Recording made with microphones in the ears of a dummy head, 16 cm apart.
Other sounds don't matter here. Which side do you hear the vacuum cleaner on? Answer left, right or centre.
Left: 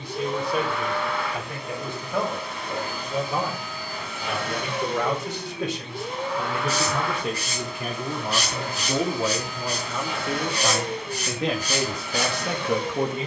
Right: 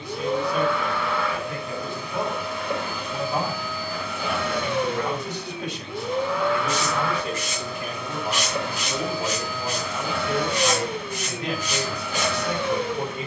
right.